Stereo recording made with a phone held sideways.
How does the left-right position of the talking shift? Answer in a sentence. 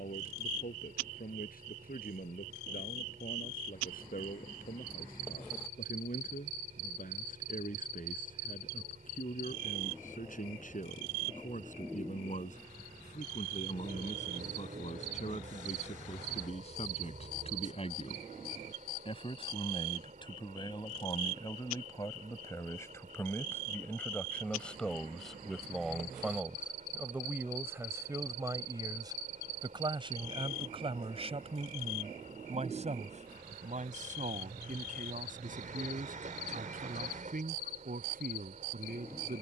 In this clip you hear the talking move to the right.